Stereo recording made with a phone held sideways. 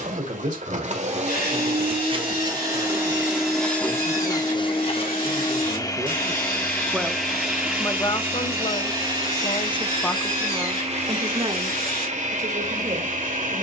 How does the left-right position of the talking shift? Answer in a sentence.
You can hear the talking go left and come back.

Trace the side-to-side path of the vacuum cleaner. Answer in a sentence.
You can hear the vacuum cleaner move from right to left and back again.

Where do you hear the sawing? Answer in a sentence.
In this clip you hear the sawing on the left.